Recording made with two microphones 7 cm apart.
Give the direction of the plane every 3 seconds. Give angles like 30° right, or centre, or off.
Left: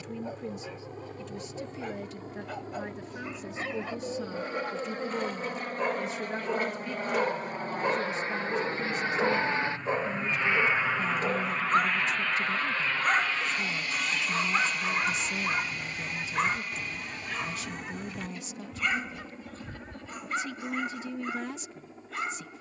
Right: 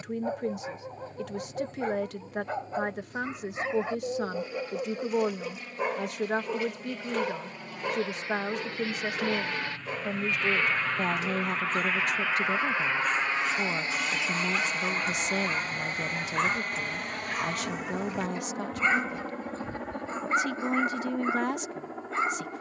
70° left, 60° left, 50° left, 20° left, 20° right, 50° right, 60° right, 70° right.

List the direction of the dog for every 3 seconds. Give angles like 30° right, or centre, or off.
30° right, 20° right, 10° left, 40° left, 40° left, centre, 30° right, 30° right.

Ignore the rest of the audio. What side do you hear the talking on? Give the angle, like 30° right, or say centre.
70° right.